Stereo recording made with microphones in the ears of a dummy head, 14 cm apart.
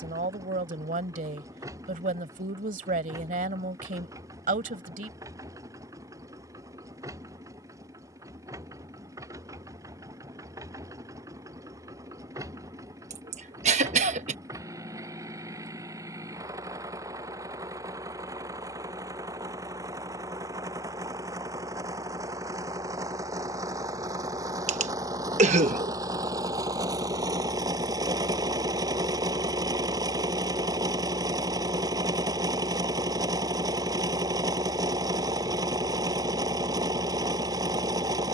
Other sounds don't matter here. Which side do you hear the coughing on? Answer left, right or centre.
right.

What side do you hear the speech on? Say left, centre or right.
right.